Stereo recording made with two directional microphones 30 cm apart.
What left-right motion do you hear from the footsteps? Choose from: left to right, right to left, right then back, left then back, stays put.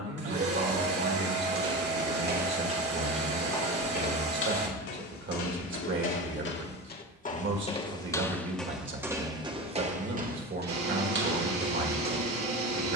left then back.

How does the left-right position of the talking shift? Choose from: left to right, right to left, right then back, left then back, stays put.
stays put.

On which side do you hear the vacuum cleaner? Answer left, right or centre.
right.